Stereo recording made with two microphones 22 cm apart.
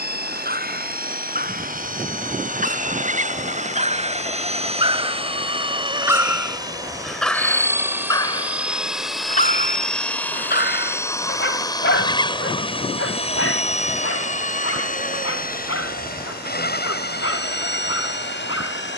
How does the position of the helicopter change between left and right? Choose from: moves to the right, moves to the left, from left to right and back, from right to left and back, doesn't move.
moves to the left.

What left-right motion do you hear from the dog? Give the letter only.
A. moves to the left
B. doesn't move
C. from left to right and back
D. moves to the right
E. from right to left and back
A.